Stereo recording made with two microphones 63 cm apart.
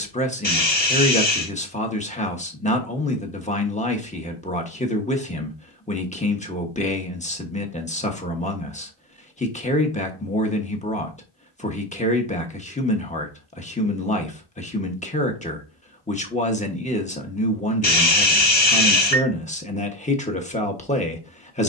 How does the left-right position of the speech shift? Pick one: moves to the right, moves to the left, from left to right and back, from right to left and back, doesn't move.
doesn't move.